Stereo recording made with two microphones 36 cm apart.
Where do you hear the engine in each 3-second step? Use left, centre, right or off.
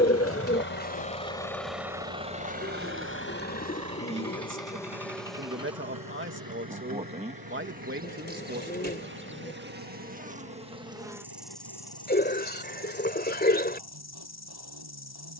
centre, right, right, right, right.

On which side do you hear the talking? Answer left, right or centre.
right.